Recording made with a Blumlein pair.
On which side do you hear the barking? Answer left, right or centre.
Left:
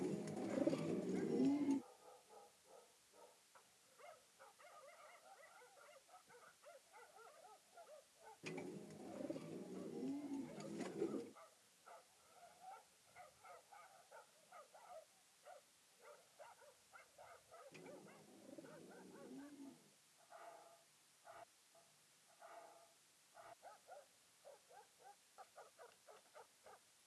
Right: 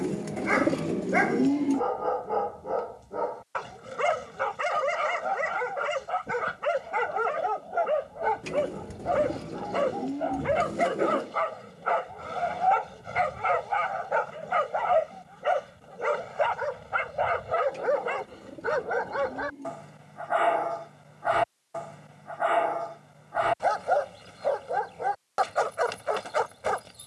right.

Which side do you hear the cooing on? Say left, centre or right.
right.